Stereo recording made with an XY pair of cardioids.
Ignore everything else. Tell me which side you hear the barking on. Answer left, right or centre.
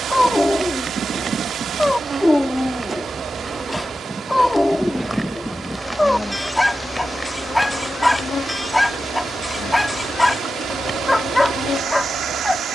centre.